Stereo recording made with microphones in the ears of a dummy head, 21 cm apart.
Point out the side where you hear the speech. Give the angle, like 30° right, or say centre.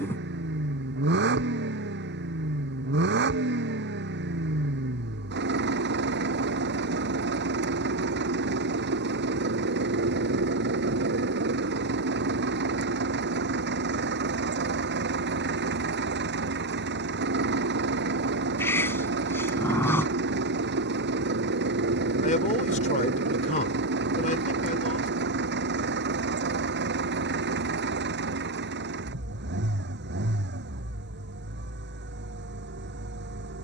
30° left.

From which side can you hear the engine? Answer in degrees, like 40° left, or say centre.
50° right.